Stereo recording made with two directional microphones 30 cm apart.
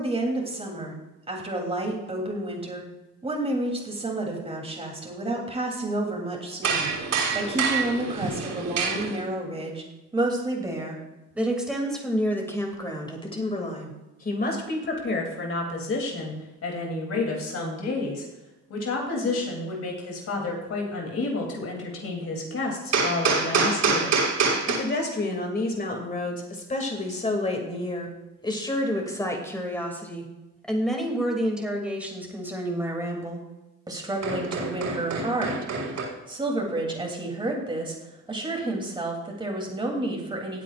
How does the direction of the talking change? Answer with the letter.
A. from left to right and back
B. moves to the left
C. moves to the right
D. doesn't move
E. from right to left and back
E.